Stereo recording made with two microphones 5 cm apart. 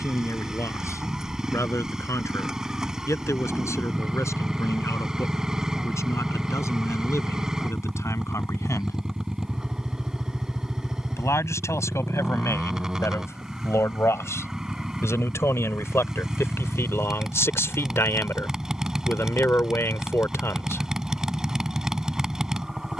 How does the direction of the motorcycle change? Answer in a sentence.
In this clip you hear the motorcycle stay put.